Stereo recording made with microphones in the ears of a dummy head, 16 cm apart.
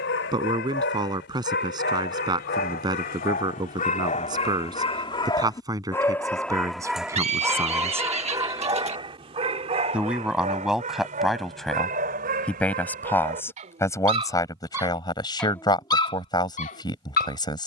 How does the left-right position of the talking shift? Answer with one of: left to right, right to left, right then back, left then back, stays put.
right to left.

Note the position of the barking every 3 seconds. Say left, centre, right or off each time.
left, left, centre, right, right, left.